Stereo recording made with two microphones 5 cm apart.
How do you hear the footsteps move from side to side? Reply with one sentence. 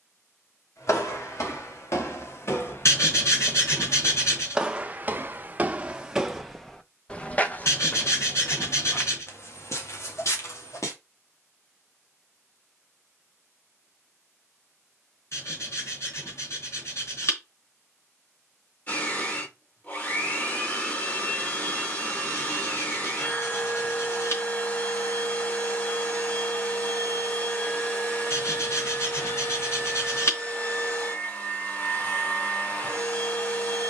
You can hear the footsteps go right and come back.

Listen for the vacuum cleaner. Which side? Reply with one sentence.
You can hear the vacuum cleaner on the left.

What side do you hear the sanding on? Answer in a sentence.
In this clip you hear the sanding on the left.